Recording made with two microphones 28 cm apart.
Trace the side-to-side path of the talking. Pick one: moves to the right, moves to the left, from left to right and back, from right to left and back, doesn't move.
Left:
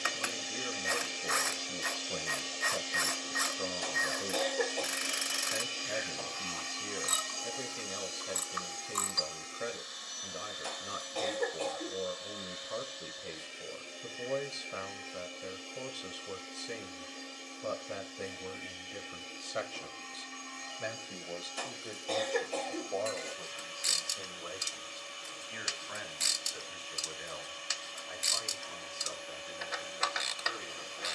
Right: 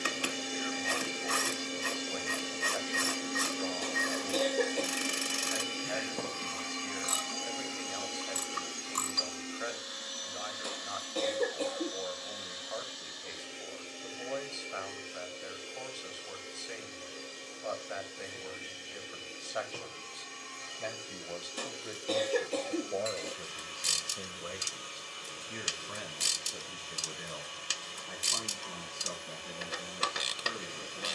moves to the right.